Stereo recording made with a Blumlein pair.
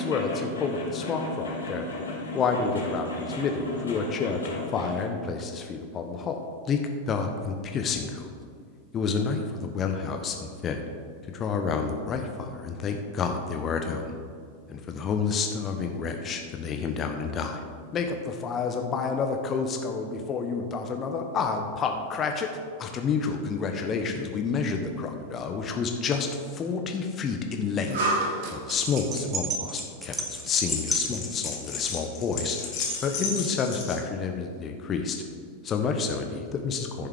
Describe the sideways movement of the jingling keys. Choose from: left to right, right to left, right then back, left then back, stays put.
right to left.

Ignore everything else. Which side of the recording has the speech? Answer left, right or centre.
left.